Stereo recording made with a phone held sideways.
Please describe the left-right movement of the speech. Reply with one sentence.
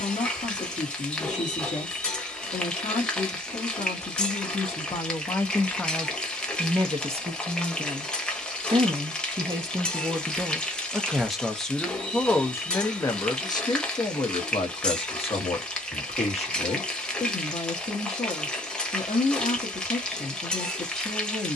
In this clip you hear the speech move from left to right and back again.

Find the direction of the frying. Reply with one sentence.
You can hear the frying in the centre.